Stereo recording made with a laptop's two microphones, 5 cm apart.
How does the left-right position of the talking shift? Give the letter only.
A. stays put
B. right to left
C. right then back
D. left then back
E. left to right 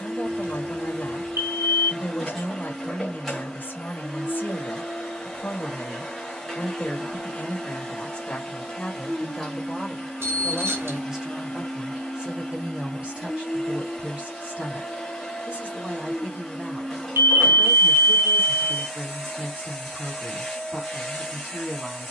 E.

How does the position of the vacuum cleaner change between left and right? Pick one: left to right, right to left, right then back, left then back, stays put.
stays put.